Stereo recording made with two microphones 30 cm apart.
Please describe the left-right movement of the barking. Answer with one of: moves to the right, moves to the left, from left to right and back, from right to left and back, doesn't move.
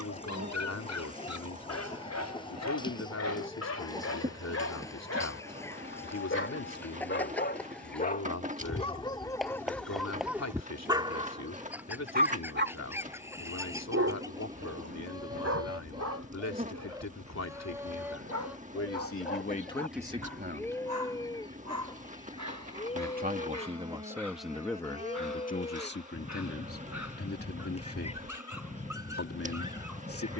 moves to the right.